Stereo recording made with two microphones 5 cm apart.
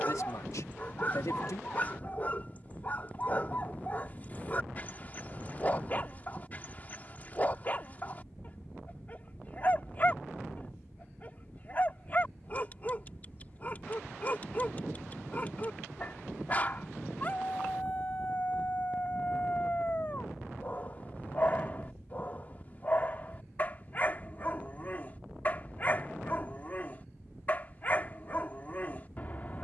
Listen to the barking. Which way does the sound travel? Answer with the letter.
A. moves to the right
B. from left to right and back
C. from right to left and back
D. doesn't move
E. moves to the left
D.